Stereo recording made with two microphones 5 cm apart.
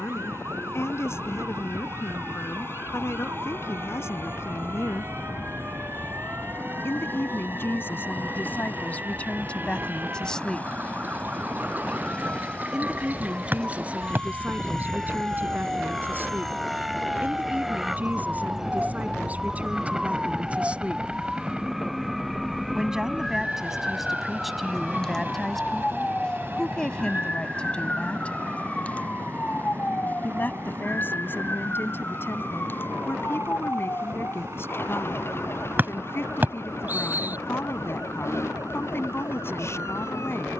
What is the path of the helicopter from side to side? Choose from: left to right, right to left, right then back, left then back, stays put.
left to right.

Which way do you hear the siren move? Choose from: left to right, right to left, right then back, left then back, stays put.
right to left.